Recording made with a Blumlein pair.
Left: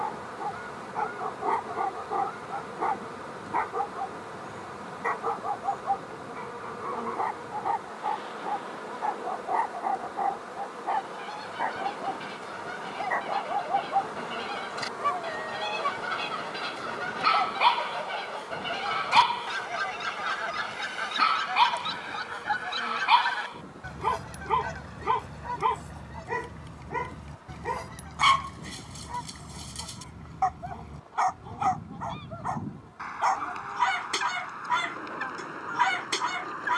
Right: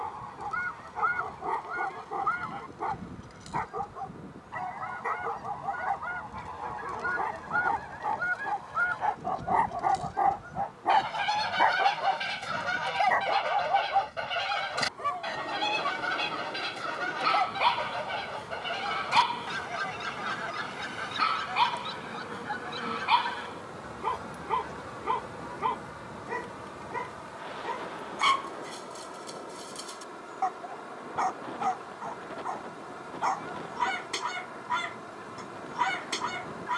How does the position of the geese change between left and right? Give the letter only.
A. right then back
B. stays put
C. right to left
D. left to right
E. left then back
C.